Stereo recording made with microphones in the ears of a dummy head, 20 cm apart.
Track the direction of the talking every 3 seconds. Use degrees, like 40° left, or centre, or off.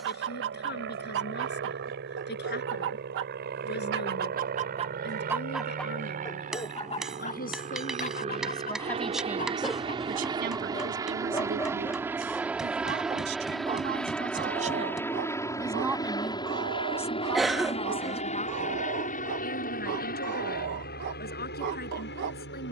50° left, 50° left, 30° left, 40° right, 50° right, centre, 40° left, 50° left.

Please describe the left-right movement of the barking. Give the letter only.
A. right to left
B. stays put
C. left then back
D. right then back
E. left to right
C.